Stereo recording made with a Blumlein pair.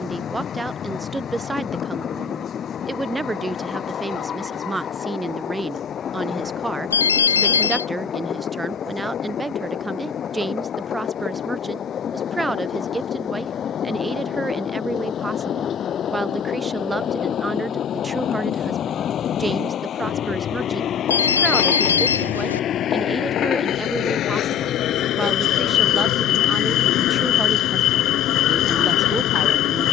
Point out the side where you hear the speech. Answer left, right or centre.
centre.